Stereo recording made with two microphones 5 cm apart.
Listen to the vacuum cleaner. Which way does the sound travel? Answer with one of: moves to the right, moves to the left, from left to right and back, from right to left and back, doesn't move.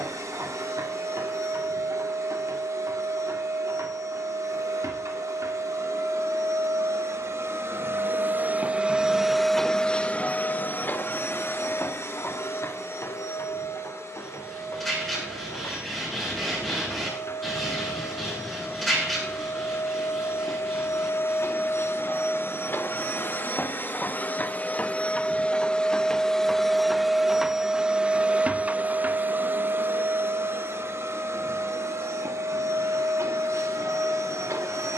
from right to left and back.